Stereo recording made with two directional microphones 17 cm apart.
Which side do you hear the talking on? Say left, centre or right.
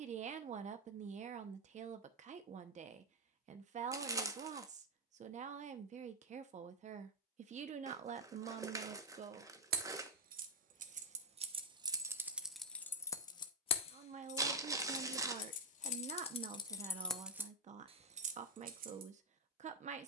right.